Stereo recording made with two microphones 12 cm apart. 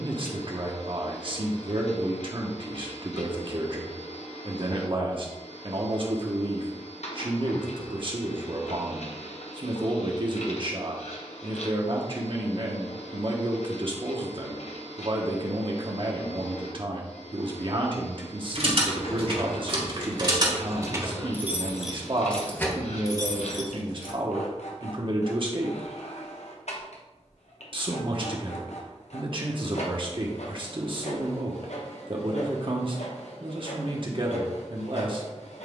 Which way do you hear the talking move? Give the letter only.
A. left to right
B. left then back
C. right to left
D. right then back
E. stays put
E.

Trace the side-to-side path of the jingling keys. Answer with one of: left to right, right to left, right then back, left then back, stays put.
right to left.